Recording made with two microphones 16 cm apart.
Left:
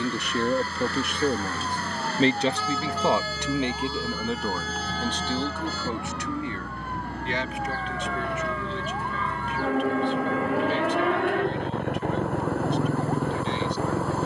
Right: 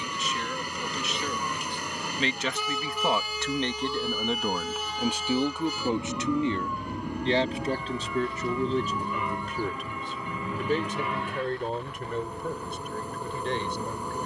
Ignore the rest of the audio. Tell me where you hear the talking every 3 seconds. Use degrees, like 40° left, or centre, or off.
50° left, centre, 30° right, 50° right, 50° right.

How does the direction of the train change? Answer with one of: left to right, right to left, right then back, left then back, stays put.
stays put.